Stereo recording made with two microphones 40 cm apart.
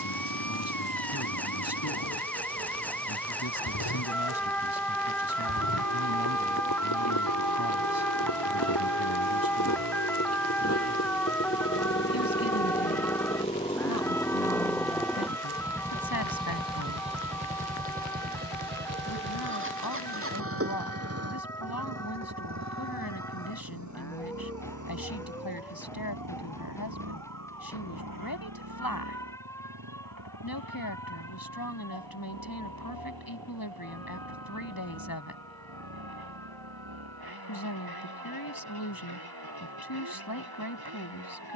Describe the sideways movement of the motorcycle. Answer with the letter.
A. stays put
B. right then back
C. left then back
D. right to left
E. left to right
E.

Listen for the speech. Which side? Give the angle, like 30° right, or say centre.
60° left.